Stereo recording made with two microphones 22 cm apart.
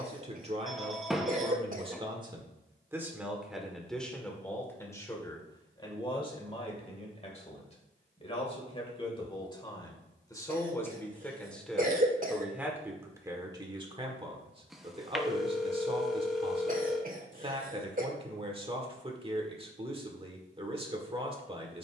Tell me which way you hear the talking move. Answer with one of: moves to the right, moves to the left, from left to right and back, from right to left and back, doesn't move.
from right to left and back.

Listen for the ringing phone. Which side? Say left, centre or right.
centre.